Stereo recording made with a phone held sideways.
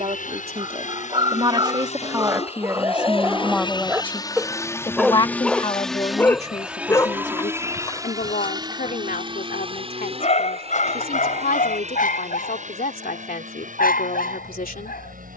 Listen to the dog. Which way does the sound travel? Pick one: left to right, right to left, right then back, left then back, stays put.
right to left.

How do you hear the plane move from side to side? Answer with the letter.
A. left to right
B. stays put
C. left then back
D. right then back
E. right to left
A.